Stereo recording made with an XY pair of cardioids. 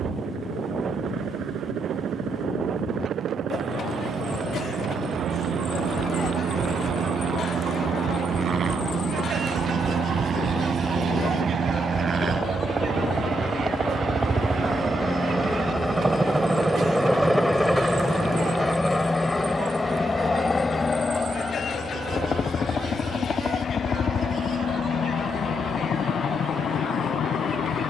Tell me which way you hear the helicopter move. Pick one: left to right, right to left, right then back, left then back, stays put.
right to left.